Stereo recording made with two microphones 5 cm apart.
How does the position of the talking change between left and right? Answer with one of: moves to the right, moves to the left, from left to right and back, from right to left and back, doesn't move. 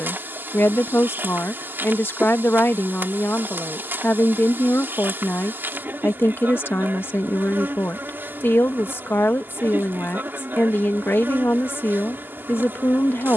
doesn't move.